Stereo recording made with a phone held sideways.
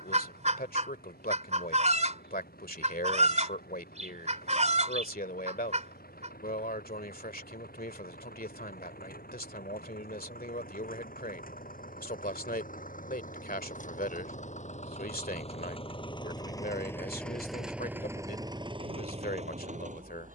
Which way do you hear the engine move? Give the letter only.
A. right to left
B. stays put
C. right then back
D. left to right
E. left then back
D.